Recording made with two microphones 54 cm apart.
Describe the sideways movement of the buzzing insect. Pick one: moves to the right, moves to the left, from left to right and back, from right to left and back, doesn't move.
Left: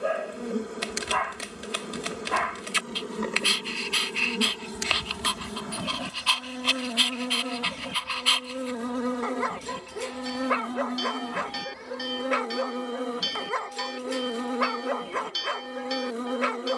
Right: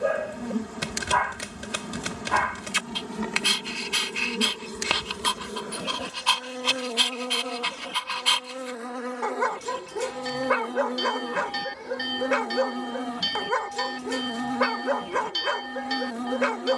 from right to left and back.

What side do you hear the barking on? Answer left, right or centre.
right.